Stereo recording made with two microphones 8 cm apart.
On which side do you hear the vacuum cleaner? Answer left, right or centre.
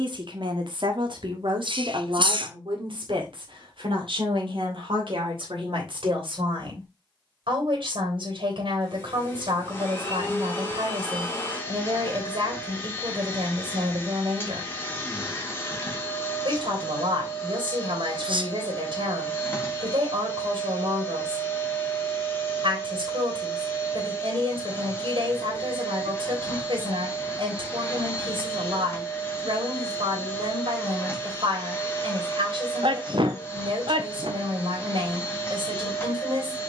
left.